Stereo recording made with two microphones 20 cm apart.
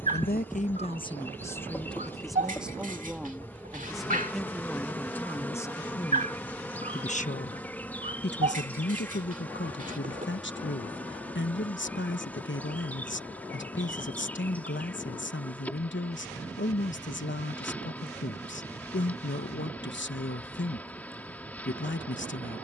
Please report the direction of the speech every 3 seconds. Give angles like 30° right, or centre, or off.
20° left, centre, 40° left, 60° left, 60° left, 60° left, 60° left, 60° left.